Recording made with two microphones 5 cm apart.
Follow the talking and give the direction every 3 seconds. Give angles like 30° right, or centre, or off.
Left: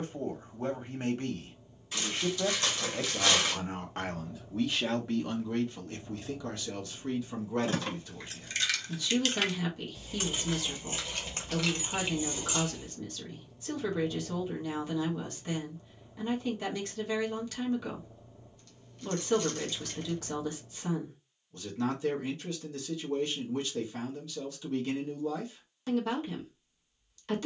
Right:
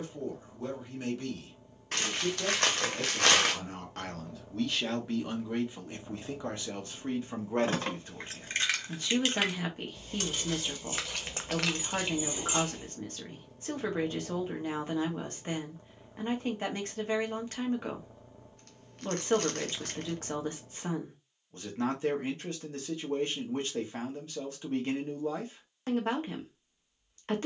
40° left, 10° left, 30° right, 40° right, 40° right, 40° right, 40° right, 40° right, 40° right.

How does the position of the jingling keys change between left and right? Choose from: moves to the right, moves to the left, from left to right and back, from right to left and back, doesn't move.
from right to left and back.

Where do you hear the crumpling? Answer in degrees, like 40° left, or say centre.
60° right.